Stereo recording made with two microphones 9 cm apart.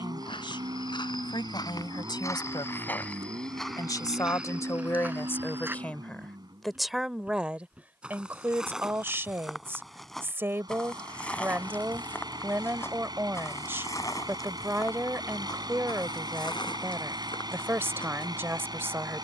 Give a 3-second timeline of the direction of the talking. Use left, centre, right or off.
left, left, centre, right, right, right, right.